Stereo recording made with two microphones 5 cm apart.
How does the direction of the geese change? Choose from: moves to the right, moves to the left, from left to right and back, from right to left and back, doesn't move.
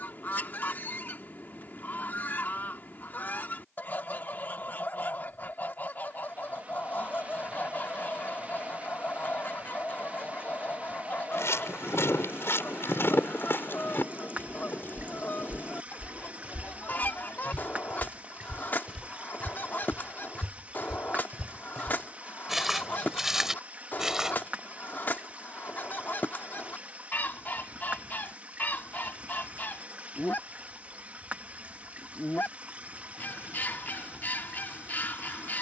doesn't move.